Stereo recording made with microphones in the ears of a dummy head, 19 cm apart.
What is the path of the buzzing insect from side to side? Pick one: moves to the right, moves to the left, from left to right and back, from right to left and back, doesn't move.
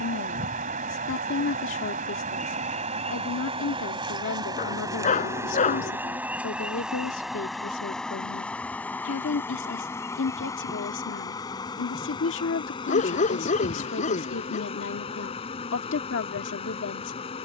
moves to the left.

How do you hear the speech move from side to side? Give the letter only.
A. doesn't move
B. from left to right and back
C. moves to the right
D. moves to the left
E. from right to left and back
A.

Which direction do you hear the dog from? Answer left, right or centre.
left.